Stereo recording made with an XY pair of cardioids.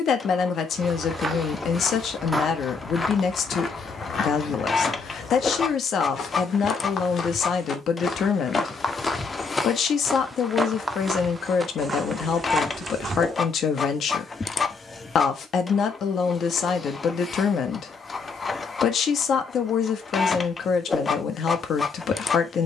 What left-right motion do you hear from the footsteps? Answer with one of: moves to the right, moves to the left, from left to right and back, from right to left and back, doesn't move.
from right to left and back.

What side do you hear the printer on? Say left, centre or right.
left.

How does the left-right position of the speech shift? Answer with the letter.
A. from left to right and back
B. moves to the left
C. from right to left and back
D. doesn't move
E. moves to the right
D.